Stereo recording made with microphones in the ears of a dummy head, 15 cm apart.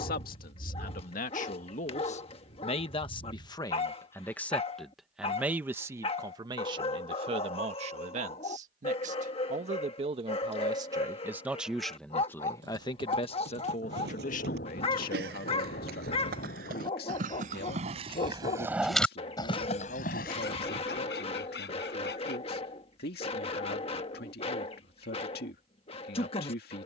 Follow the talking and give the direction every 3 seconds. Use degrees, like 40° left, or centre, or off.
50° left, 10° left, 40° right, 30° right, 40° left, 60° left, 70° left, 70° left, 70° left.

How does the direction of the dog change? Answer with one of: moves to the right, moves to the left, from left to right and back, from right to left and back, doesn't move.
doesn't move.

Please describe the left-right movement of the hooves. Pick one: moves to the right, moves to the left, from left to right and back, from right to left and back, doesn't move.
moves to the left.